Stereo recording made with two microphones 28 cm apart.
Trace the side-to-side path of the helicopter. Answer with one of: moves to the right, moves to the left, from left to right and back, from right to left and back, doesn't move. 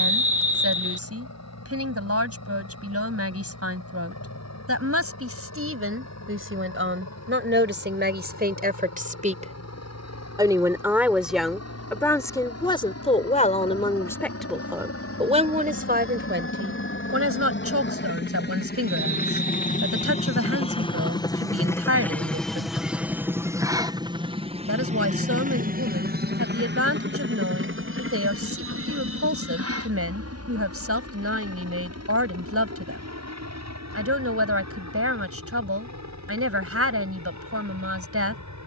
moves to the right.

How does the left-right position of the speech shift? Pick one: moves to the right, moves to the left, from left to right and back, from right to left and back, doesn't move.
from right to left and back.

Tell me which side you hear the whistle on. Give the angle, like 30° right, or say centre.
50° right.